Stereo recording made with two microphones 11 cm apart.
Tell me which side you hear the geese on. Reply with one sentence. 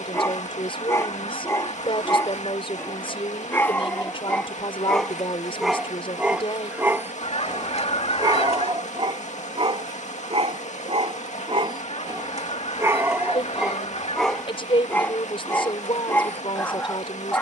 You can hear the geese on the left.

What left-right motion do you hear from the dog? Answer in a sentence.
You can hear the dog move from left to right and back again.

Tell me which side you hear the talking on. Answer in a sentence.
You can hear the talking on the left.